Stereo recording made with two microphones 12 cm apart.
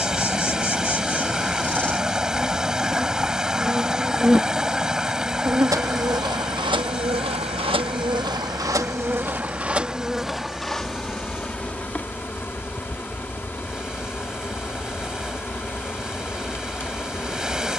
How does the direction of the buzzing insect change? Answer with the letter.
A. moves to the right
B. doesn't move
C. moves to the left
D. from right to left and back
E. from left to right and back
E.